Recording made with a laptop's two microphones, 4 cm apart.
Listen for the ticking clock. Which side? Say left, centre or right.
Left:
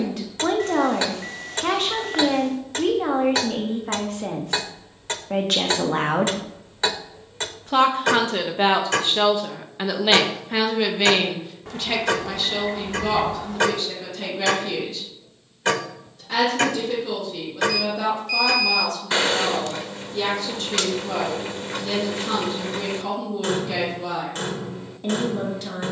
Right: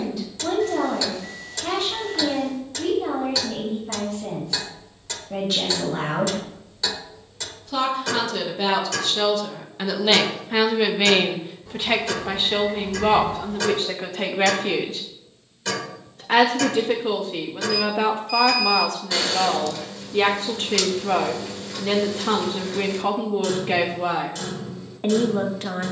left.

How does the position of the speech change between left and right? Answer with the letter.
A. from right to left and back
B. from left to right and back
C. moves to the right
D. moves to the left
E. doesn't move
C.